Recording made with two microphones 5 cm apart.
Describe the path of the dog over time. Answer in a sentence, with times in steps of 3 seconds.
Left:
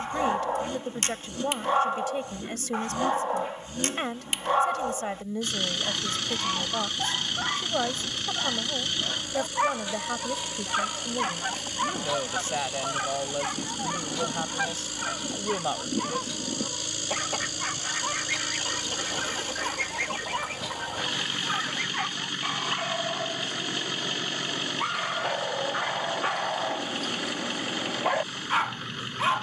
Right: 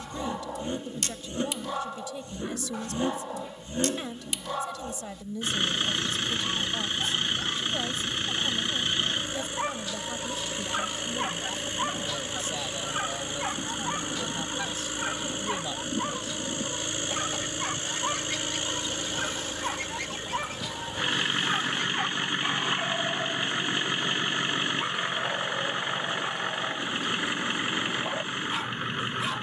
You can hear the dog on the left from 0 s, in the centre from 12 s and on the left from 24 s.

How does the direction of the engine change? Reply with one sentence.
You can hear the engine stay put.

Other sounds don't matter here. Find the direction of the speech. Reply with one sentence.
You can hear the speech on the left.